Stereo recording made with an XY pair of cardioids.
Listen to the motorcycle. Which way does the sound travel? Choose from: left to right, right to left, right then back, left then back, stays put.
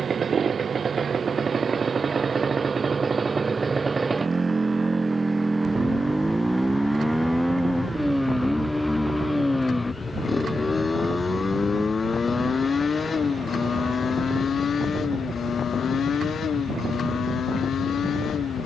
right to left.